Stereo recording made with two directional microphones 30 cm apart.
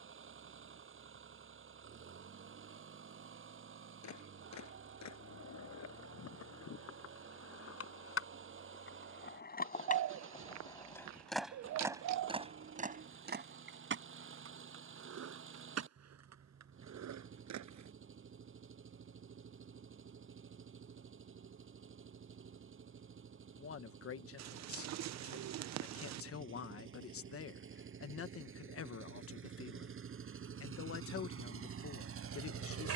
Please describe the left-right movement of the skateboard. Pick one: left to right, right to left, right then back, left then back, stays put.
left to right.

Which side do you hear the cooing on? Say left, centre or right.
right.